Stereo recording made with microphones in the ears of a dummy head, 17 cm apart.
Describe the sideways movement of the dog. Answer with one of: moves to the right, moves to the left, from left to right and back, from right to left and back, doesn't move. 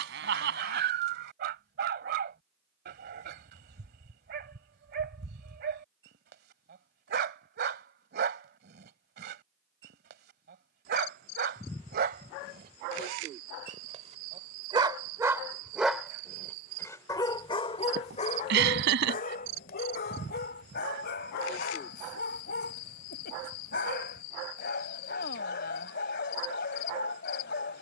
moves to the left.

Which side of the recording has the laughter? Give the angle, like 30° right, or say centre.
70° right.